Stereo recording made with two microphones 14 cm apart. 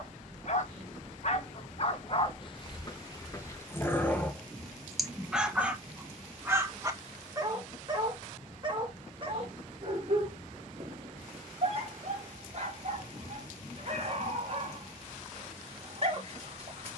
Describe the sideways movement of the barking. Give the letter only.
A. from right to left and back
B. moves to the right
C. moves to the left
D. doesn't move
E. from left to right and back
B.